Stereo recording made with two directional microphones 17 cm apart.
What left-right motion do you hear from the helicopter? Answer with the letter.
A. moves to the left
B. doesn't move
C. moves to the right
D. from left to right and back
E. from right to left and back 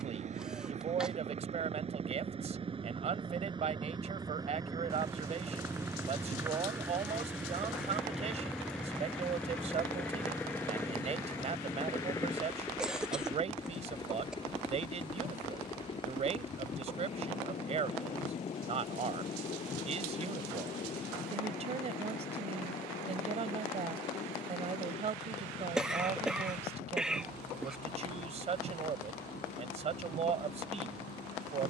A.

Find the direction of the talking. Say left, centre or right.
right.